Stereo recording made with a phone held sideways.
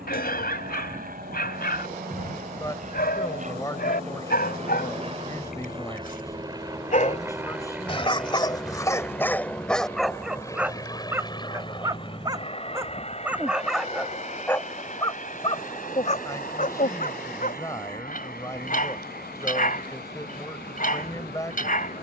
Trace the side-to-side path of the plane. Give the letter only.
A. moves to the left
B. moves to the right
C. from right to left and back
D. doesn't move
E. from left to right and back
A.